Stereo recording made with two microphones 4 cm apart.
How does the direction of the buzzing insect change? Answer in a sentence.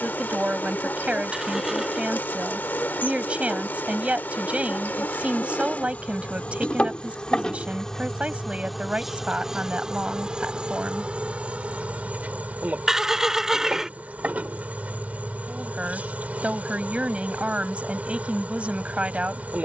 In this clip you hear the buzzing insect travel towards the right.